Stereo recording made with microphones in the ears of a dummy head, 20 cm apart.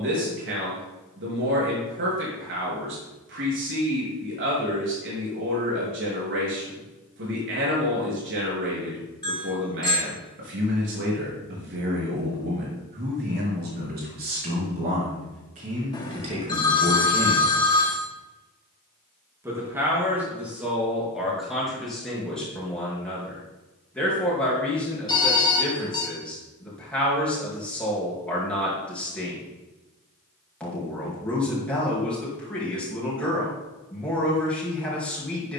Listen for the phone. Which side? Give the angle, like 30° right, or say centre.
20° left.